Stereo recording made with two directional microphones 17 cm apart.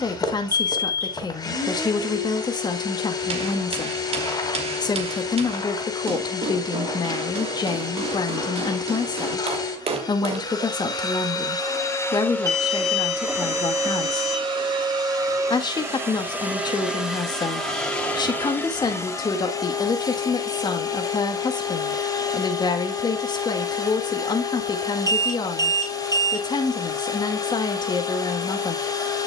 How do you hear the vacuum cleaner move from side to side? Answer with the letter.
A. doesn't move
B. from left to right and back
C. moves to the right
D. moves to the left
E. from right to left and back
B.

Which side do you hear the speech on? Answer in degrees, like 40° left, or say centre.
20° left.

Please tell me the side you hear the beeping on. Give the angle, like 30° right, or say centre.
20° right.